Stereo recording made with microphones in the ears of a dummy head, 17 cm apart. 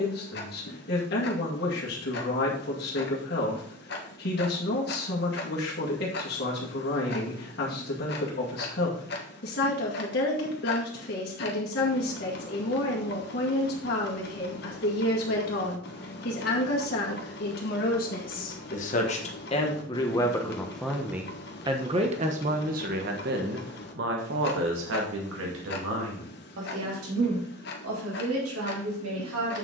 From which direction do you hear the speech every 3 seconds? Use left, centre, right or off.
left, left, left, left, left, left, left, right, right, right.